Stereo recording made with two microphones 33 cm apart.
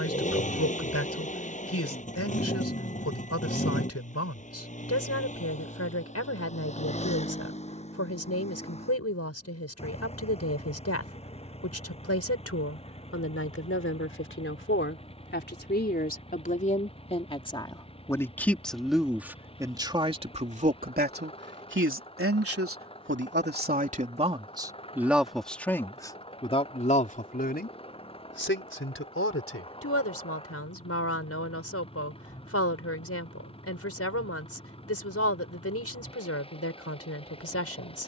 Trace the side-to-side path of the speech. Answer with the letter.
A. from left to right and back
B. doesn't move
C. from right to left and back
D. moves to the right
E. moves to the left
A.